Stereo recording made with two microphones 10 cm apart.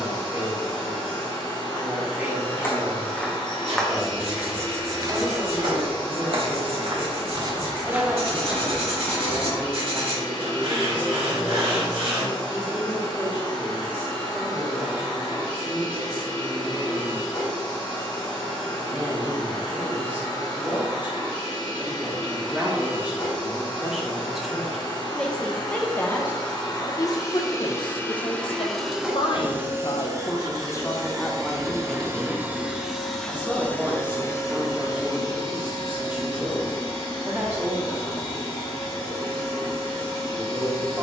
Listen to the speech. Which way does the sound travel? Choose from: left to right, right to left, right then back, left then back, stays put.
left then back.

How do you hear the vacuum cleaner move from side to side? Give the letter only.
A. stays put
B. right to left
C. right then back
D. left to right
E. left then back
C.